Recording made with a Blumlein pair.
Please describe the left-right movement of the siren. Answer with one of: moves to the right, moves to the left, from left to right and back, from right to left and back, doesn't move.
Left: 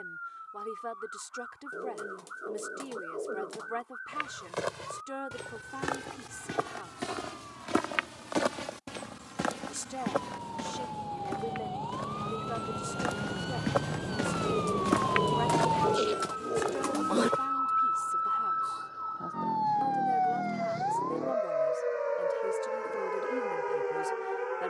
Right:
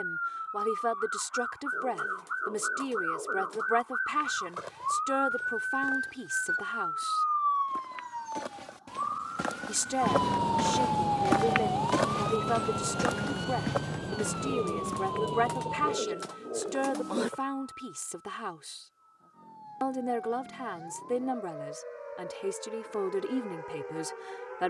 moves to the left.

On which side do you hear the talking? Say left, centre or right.
right.